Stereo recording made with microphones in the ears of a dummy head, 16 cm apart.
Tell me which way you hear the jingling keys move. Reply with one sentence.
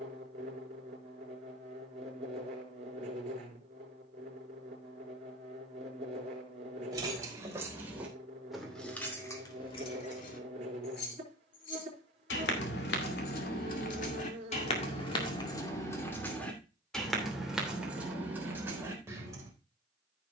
In this clip you hear the jingling keys move from right to left and back again.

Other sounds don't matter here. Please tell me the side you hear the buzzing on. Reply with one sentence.
In this clip you hear the buzzing on the right.